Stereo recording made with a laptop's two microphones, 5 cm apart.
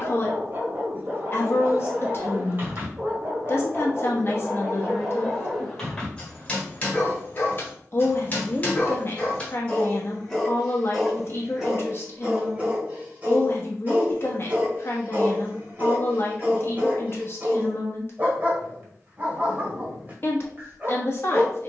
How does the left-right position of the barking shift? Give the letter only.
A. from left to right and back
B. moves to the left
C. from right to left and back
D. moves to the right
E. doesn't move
C.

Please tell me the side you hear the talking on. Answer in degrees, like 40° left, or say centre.
40° left.